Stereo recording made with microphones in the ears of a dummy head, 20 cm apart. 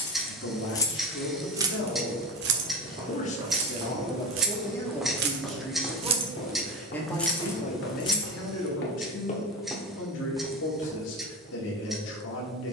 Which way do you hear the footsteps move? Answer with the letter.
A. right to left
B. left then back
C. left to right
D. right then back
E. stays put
B.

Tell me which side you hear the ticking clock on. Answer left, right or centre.
centre.